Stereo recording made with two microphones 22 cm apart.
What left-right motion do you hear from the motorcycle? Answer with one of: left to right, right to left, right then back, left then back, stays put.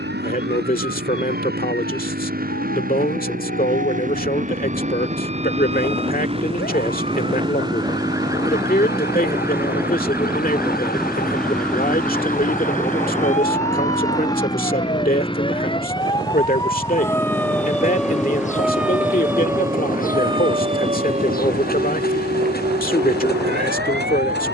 right to left.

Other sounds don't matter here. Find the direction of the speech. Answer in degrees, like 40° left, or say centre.
40° left.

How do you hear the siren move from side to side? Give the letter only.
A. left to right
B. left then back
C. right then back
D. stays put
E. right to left
A.